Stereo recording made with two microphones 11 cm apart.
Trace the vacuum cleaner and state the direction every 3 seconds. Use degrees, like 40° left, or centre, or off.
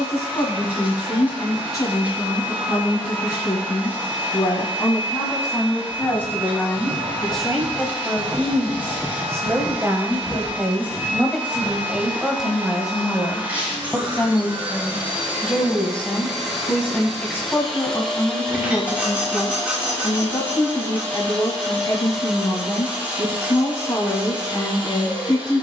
20° right, 20° right, 20° right, 20° right, 20° right, centre, 10° left, centre, 10° right.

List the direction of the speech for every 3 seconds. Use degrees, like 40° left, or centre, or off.
30° left, 30° left, centre, 10° right, centre, 20° left, 30° left, 30° left, 30° left.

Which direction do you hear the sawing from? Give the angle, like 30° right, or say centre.
10° right.